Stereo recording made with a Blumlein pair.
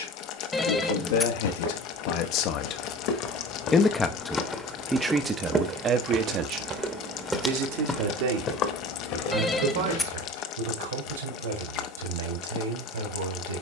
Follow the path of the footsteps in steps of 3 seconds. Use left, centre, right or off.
left, centre, centre, left, off.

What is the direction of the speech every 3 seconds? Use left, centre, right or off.
left, centre, right, right, right.